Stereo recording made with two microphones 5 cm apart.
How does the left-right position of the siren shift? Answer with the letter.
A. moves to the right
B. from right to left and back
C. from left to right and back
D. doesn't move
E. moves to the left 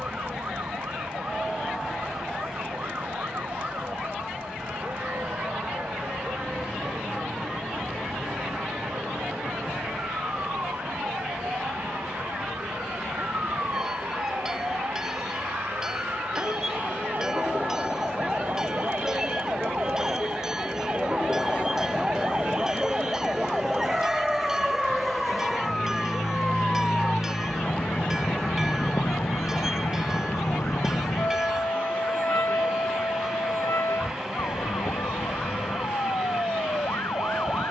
E.